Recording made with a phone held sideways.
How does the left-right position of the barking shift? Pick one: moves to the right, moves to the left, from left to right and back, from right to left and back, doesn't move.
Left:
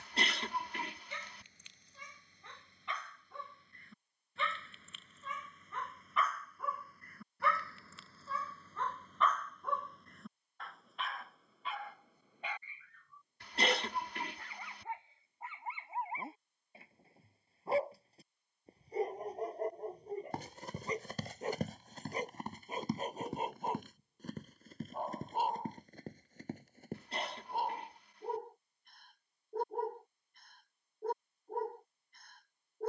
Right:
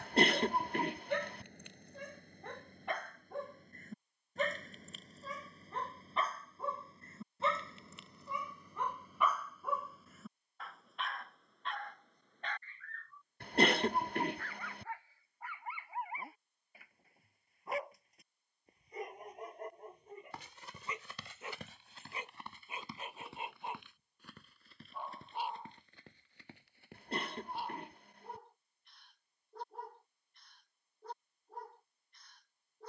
moves to the left.